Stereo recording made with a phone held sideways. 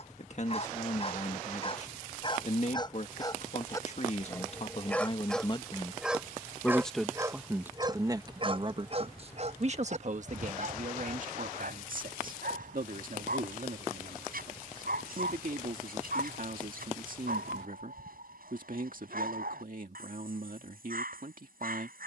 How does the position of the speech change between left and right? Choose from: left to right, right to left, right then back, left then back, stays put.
left to right.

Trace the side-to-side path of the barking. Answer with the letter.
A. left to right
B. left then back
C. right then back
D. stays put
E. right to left
A.